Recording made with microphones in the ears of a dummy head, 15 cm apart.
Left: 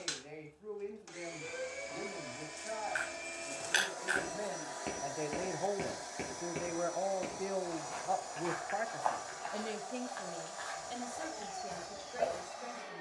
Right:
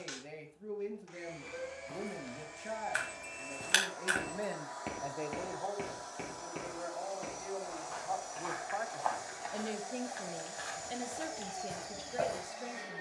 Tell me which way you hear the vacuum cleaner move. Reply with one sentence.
You can hear the vacuum cleaner travel towards the right.